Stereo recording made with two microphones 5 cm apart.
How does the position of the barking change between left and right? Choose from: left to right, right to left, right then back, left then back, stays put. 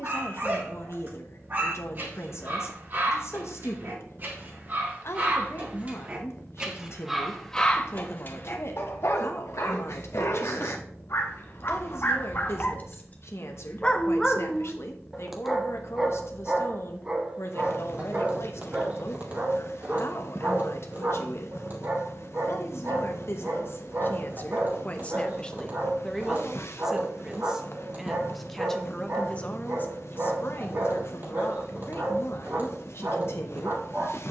left then back.